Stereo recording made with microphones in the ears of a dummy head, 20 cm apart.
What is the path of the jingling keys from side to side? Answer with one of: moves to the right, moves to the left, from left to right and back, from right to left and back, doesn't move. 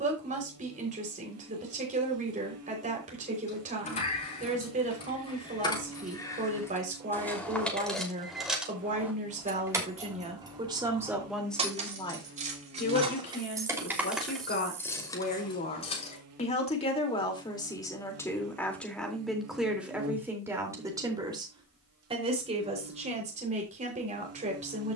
from left to right and back.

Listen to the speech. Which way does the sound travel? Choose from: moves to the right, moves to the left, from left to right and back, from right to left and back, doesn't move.
from right to left and back.